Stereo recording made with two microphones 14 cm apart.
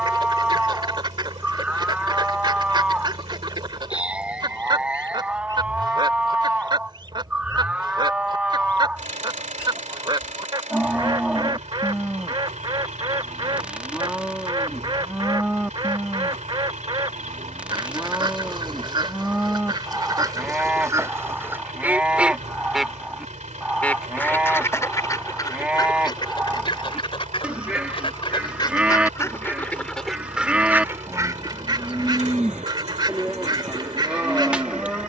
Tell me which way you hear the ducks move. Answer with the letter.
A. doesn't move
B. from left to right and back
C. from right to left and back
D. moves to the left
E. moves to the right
C.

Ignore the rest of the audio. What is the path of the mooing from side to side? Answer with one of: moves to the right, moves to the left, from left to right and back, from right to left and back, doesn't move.
doesn't move.